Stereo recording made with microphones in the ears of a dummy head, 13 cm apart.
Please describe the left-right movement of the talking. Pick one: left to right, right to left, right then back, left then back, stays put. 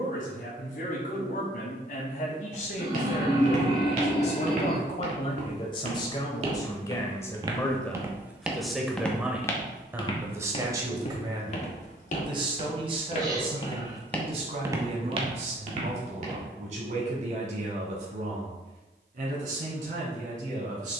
left to right.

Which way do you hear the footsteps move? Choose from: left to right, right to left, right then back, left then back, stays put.
left then back.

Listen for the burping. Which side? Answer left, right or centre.
right.